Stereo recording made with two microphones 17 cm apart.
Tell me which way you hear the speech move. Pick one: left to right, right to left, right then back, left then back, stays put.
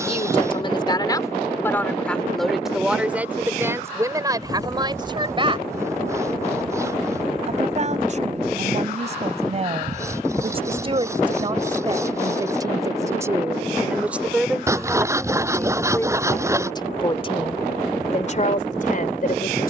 right then back.